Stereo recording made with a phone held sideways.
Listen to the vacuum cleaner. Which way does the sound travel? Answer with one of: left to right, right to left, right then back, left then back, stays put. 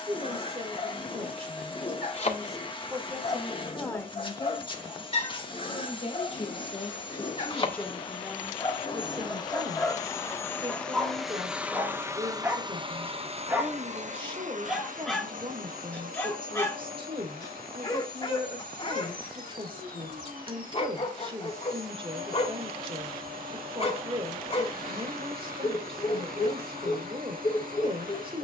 left to right.